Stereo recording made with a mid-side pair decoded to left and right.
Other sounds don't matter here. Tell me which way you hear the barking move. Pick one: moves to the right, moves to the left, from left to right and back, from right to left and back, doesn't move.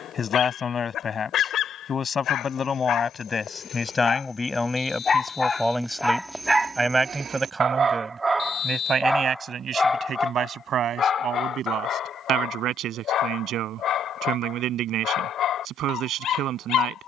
from left to right and back.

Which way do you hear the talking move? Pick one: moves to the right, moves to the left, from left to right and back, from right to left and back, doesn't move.
moves to the right.